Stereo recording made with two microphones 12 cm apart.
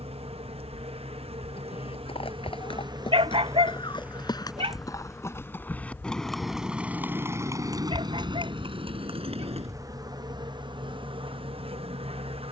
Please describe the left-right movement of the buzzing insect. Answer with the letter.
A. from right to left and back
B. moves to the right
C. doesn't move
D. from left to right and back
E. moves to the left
A.